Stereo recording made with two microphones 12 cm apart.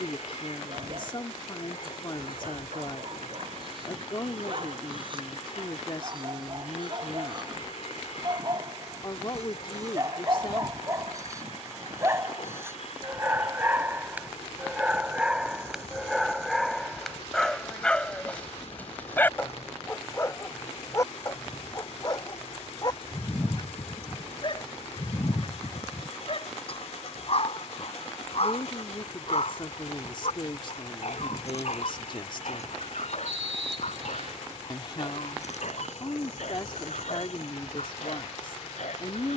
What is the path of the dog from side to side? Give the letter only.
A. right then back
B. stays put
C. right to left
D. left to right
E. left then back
C.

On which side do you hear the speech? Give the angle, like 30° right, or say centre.
40° left.